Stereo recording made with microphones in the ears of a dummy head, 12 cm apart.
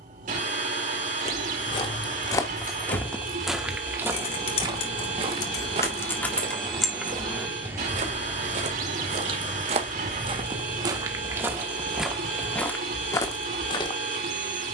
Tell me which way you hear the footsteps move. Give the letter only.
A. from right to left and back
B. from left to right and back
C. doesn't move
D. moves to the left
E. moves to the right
B.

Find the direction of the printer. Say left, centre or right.
right.